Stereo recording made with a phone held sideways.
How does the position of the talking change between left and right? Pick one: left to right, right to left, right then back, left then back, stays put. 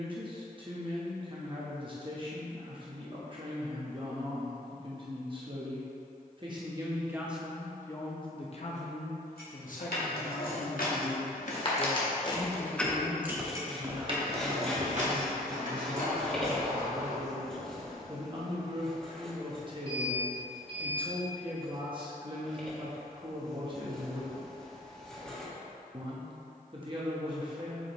left then back.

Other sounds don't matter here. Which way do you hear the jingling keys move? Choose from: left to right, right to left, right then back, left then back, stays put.
left to right.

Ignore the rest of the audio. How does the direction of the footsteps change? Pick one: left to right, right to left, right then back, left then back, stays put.
left to right.